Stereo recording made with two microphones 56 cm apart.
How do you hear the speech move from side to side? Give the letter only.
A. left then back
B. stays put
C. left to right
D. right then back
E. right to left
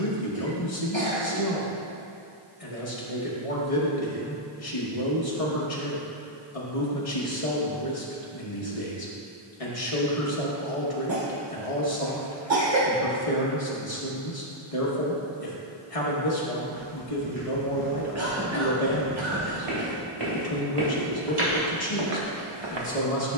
B.